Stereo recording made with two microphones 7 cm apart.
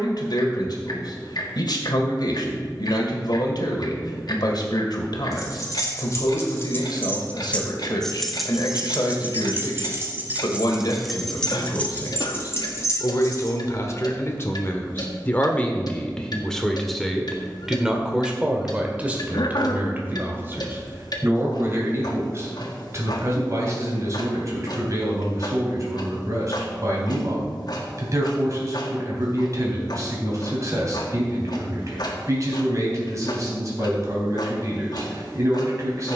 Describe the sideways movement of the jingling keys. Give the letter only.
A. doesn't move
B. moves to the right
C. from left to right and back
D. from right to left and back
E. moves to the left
C.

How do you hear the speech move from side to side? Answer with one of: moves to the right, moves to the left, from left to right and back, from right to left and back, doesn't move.
moves to the right.